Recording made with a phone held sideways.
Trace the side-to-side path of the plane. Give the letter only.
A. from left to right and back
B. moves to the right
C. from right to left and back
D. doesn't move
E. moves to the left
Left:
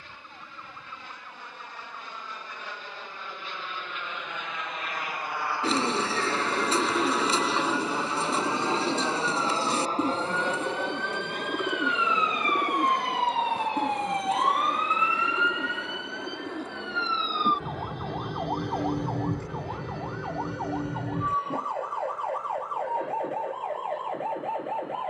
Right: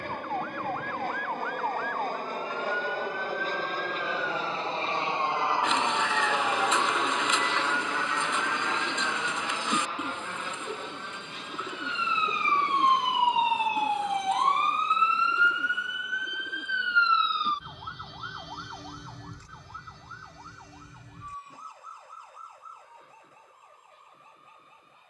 E.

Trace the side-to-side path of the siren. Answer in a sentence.
In this clip you hear the siren go from the right side to the left.